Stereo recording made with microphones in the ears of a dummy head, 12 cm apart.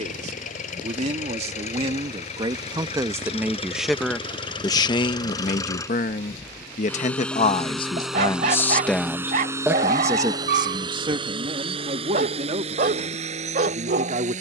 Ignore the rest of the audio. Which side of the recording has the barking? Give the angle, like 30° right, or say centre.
50° right.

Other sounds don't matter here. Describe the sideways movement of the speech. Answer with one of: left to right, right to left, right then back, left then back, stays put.
left then back.